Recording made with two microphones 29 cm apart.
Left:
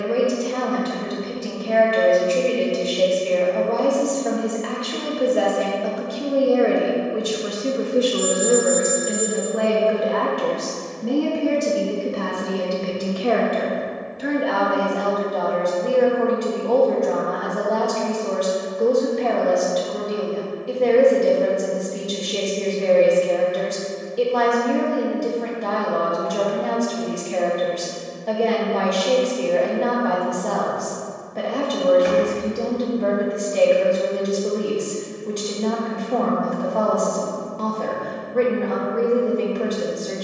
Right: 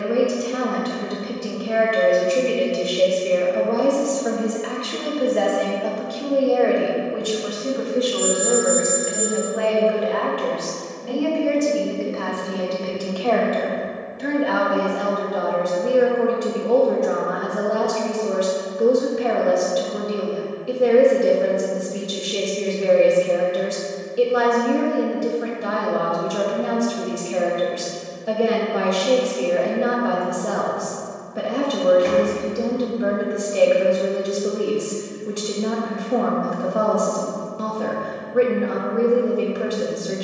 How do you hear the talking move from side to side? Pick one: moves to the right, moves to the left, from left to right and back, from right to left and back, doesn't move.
from right to left and back.